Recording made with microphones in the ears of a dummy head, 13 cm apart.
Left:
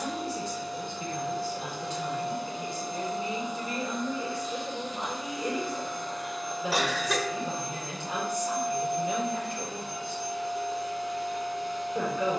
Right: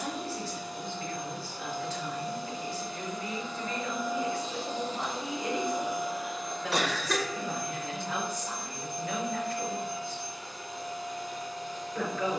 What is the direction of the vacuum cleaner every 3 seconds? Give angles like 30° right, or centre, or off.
50° left, 10° right, 20° left, 60° left.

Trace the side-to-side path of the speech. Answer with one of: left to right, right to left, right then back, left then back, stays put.
stays put.